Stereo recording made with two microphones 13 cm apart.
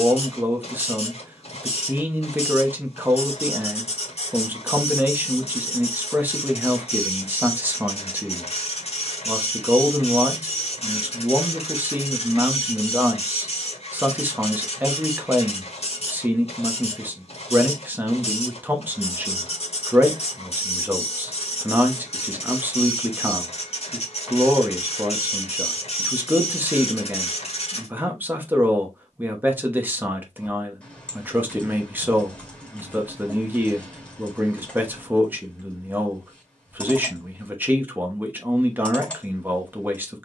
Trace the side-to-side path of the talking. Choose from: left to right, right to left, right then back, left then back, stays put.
stays put.